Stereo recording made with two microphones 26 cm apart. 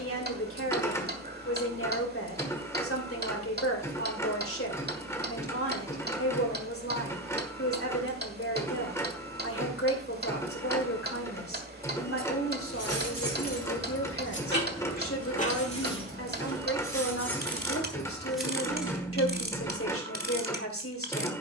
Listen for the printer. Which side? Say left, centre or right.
centre.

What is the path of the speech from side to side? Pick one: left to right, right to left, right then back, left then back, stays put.
stays put.